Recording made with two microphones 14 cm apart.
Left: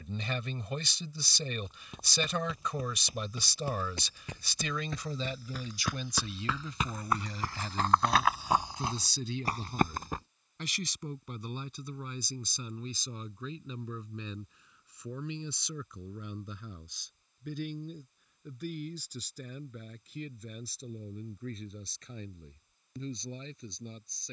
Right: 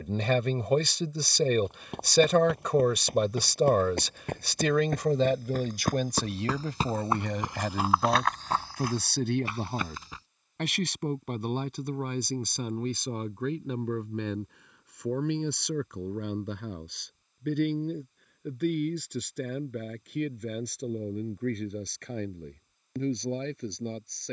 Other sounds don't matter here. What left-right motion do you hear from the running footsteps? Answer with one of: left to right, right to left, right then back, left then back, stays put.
right to left.